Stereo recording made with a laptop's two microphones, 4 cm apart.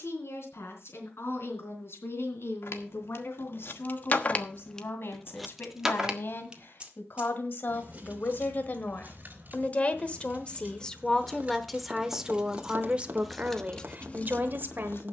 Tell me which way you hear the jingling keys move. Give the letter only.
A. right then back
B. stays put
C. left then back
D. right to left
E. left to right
A.